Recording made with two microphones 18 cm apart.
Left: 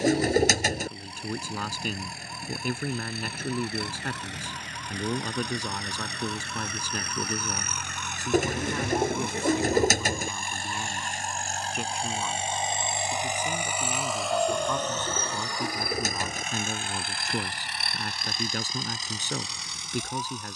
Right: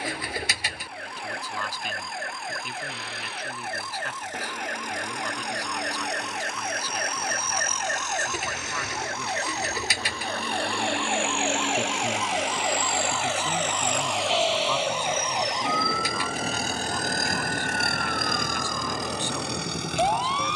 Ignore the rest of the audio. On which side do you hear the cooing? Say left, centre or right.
left.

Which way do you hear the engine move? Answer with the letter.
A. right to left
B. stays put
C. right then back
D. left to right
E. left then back
D.